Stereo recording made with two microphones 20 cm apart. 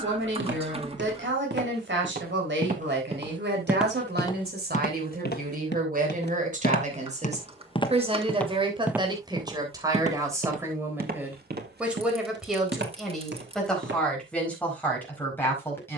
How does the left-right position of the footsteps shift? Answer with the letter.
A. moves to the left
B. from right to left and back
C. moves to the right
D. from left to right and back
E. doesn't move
B.